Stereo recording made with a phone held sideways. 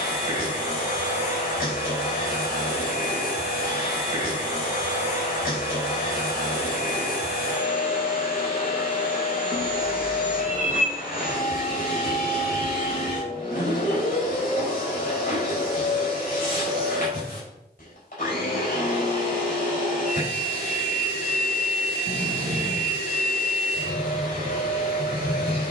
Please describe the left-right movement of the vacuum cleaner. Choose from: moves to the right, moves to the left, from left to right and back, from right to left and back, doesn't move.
doesn't move.